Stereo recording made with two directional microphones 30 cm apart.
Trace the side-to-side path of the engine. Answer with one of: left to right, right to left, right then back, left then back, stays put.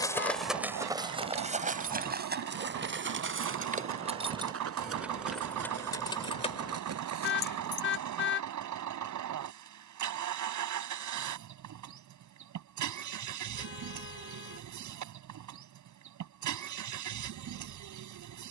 stays put.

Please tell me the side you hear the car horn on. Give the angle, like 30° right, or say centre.
40° left.